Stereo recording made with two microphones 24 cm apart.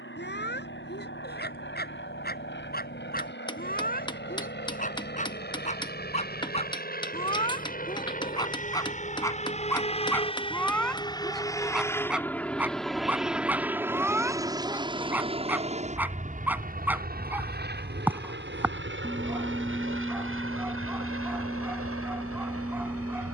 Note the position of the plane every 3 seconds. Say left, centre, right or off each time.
left, left, left, left, centre, right, right, right.